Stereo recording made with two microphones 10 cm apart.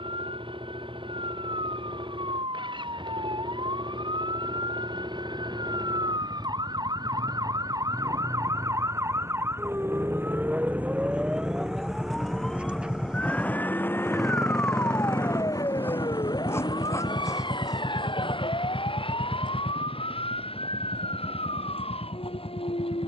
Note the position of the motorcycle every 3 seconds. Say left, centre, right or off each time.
right, right, right, right, centre, left, left, left.